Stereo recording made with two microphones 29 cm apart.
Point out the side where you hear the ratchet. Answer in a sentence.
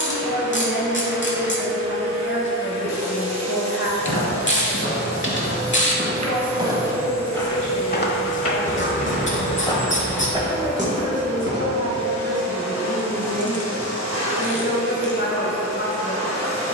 You can hear the ratchet on the left.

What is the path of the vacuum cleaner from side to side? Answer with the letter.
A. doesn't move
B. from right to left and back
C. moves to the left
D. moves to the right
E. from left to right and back
A.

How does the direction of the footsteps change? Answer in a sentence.
In this clip you hear the footsteps move from right to left and back again.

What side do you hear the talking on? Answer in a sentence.
You can hear the talking on the left.